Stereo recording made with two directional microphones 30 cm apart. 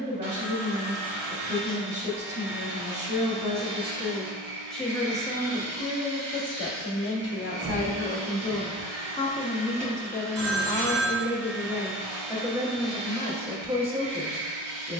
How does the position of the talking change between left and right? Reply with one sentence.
You can hear the talking go left and come back.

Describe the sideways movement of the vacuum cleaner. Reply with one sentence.
In this clip you hear the vacuum cleaner stay put.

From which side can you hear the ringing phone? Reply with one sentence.
In this clip you hear the ringing phone on the right.